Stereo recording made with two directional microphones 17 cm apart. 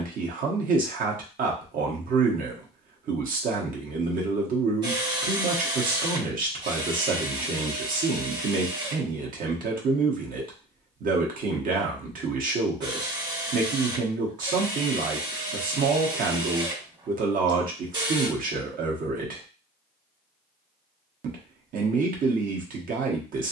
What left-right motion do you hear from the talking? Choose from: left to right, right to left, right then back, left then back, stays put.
stays put.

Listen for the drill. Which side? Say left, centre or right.
right.